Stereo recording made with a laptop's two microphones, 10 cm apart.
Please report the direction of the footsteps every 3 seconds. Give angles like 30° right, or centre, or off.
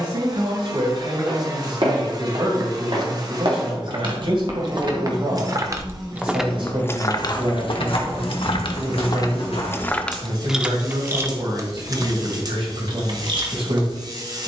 70° right, 50° right, 50° left, 80° left, off.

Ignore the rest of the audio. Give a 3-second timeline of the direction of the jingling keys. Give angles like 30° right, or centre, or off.
off, 40° right, 40° left, centre, 50° right.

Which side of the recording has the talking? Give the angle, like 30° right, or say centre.
60° right.